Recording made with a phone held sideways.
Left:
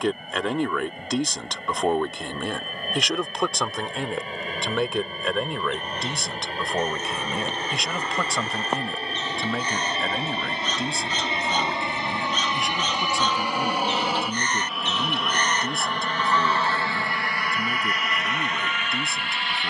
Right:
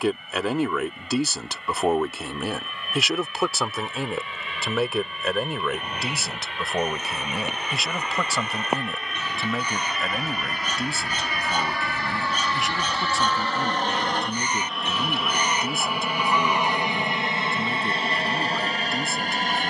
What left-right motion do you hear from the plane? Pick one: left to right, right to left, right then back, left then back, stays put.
left to right.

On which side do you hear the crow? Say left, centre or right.
centre.